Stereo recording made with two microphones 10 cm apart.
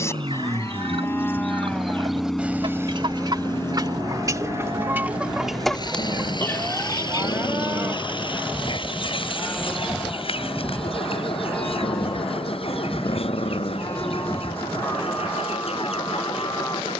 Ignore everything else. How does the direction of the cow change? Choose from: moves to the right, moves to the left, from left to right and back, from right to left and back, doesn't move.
from left to right and back.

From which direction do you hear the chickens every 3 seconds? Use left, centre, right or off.
right, right, left, left, left, left.